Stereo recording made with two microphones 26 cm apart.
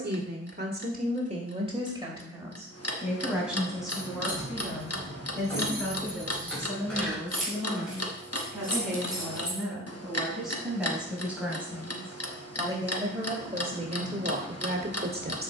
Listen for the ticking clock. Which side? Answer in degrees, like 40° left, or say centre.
70° left.